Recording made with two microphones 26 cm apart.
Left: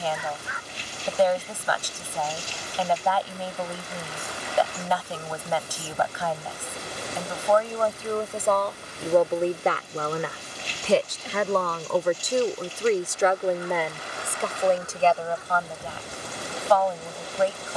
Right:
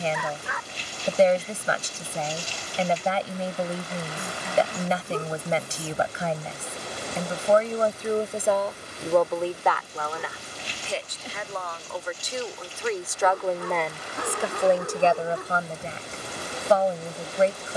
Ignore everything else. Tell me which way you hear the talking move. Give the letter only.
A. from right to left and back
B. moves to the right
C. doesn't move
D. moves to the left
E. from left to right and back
A.